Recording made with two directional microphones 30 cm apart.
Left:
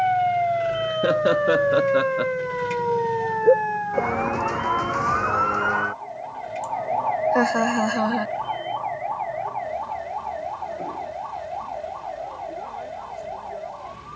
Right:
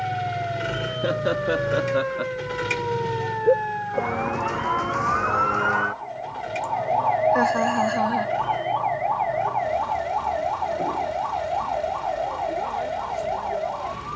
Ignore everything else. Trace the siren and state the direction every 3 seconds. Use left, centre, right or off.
left, centre, right, right, right.